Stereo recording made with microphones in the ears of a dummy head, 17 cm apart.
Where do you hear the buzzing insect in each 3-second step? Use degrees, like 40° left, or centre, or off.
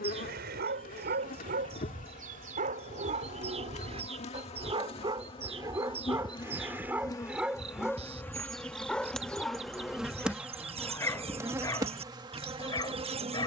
40° left, 30° left, 20° left, 10° right, 30° right.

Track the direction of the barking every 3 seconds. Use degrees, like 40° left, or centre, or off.
50° right, 30° right, 10° right, 10° left, 20° left.